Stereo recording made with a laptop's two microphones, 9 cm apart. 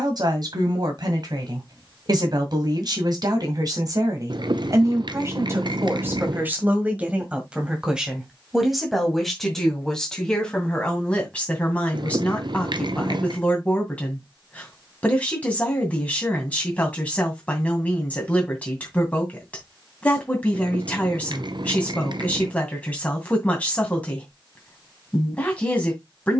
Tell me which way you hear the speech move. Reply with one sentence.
You can hear the speech move to the left.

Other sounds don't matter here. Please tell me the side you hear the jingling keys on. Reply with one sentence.
You can hear the jingling keys on the right.